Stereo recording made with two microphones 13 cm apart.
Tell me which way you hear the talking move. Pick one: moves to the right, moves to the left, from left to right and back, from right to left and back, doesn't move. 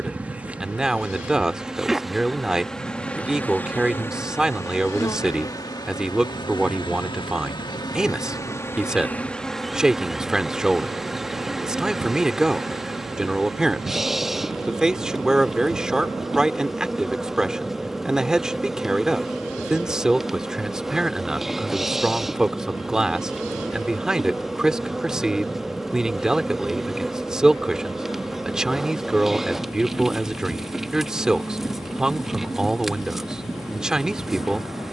doesn't move.